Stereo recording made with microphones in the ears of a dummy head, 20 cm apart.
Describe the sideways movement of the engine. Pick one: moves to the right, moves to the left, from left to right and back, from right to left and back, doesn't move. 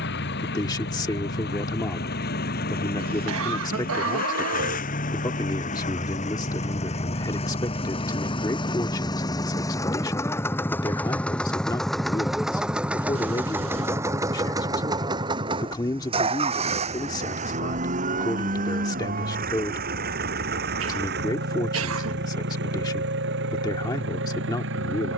moves to the right.